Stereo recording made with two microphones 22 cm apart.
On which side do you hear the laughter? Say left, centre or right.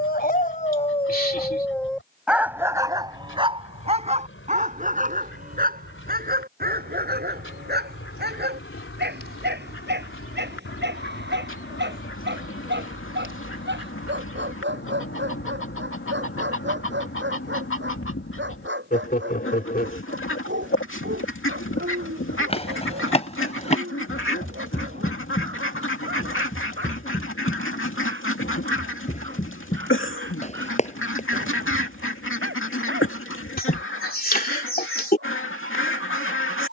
left.